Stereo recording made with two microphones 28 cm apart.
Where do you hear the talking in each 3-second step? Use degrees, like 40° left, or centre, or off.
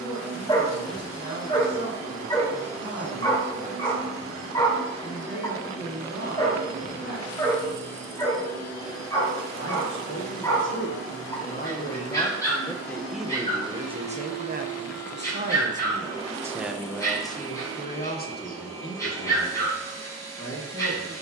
60° left, 60° left, 60° left, 40° left, 10° right, 10° right, 50° left.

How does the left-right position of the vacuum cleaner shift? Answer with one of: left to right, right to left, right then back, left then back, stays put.
stays put.